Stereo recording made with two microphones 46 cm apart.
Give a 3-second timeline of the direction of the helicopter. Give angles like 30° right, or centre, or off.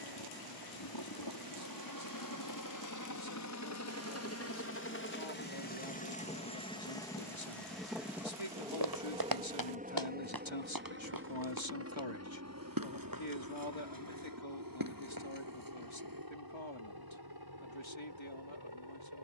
50° left, 30° left, centre, 20° right, 40° right, 50° right, 50° right.